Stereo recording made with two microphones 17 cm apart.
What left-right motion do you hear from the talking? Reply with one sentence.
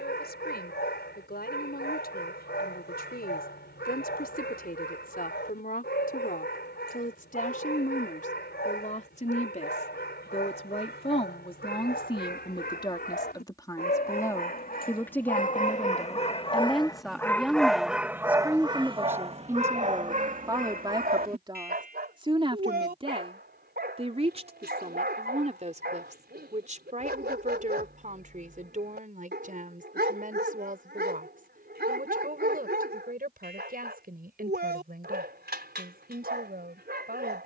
In this clip you hear the talking go from the left side to the right.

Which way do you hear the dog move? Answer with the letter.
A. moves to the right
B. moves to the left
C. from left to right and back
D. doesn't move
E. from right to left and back
A.